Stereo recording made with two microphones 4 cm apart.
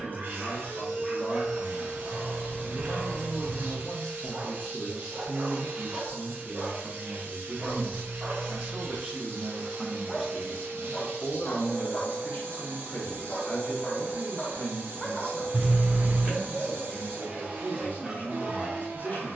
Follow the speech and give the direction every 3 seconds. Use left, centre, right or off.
left, centre, right, centre, left, left, left.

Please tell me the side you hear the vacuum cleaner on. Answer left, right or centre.
right.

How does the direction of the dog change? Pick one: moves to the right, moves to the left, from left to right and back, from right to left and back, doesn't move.
from right to left and back.